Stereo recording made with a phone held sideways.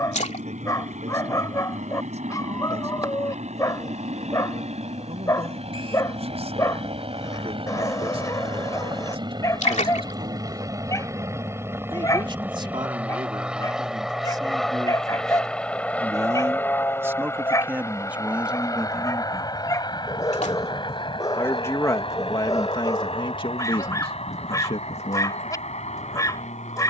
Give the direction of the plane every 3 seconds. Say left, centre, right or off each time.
right, right, right, right, centre, centre, left, left, left.